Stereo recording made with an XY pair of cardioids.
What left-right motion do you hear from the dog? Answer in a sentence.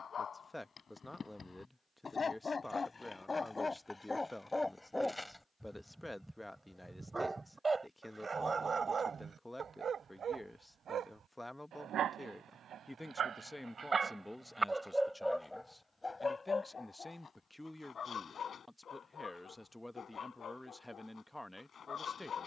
In this clip you hear the dog move from left to right and back again.